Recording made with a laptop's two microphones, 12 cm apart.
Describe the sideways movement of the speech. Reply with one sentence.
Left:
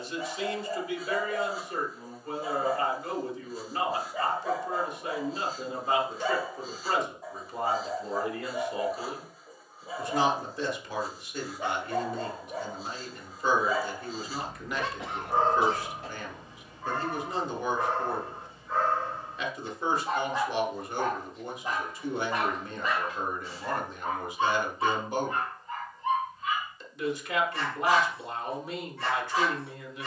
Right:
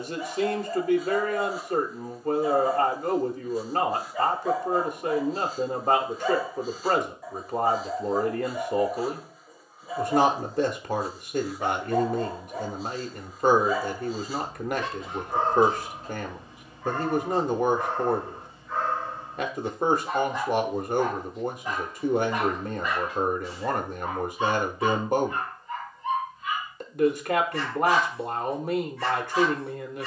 In this clip you hear the speech stay put.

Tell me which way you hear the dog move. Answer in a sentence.
You can hear the dog stay put.